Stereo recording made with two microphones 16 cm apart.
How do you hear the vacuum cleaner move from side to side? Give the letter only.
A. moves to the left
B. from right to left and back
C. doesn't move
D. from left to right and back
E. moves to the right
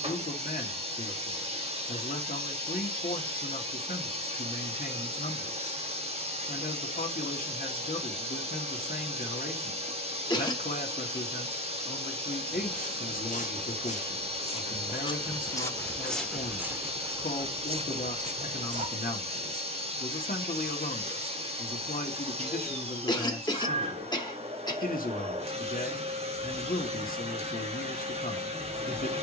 C.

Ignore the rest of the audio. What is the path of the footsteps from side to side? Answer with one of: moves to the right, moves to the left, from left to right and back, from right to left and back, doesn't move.
moves to the right.